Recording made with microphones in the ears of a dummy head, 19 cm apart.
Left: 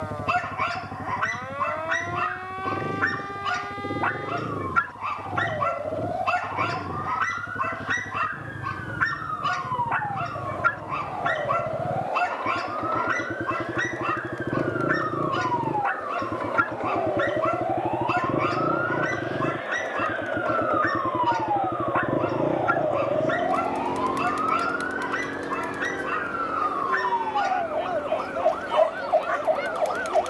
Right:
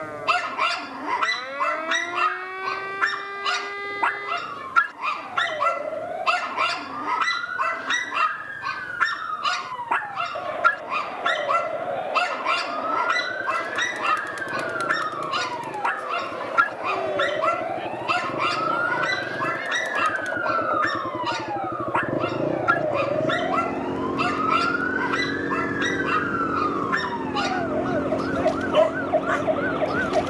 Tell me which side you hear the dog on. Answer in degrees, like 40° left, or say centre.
50° right.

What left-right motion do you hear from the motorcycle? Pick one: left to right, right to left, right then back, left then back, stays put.
left to right.